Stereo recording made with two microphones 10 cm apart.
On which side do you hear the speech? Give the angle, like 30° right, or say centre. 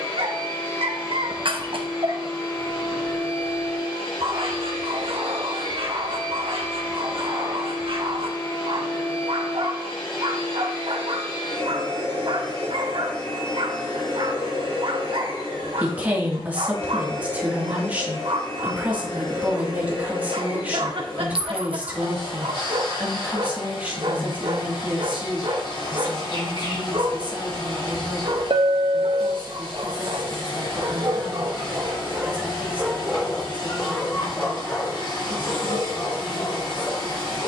20° right.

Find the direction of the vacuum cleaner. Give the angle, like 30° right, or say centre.
50° left.